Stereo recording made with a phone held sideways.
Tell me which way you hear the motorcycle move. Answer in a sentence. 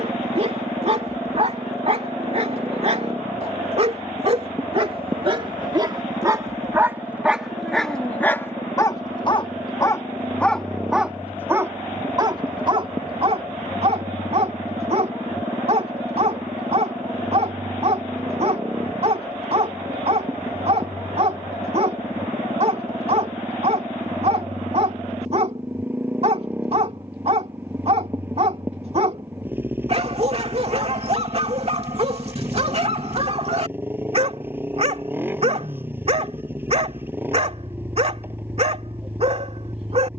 You can hear the motorcycle stay in one place.